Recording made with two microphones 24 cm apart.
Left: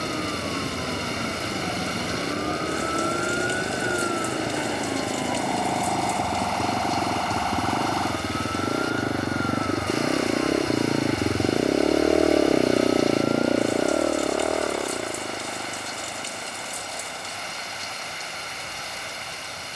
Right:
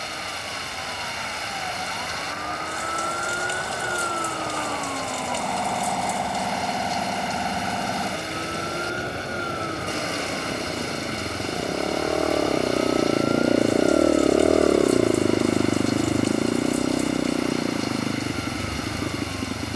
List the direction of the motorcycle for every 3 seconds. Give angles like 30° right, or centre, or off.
70° left, 70° left, 60° left, 40° left, 10° right, 60° right, 80° right.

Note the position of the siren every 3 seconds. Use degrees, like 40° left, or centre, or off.
40° left, 10° left, 10° right, 30° right, 50° right, 50° right, 60° right.